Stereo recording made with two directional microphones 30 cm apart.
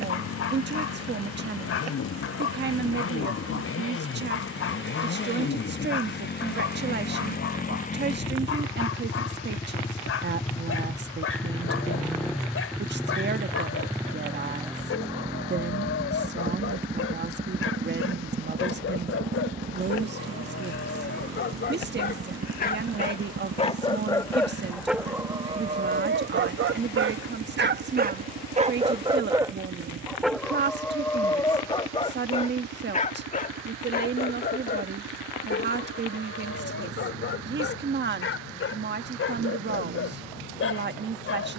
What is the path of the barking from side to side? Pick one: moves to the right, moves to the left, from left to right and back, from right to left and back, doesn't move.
from left to right and back.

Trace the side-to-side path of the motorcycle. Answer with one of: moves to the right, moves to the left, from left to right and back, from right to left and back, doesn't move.
moves to the right.